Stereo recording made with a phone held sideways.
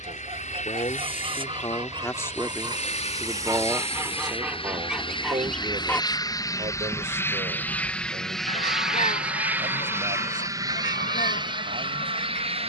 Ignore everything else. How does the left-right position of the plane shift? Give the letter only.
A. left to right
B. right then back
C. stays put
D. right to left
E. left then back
A.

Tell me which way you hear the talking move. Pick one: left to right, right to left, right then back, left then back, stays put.
left to right.